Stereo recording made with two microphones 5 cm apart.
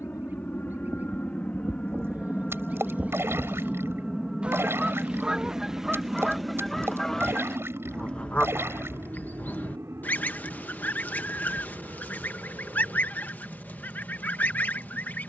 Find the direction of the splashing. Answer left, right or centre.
right.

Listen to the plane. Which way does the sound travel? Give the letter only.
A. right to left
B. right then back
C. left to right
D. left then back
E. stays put
C.